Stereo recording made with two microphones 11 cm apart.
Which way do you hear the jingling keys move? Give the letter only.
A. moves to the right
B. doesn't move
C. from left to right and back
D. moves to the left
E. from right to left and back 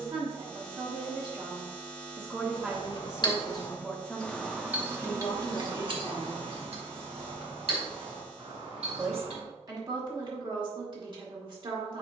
A.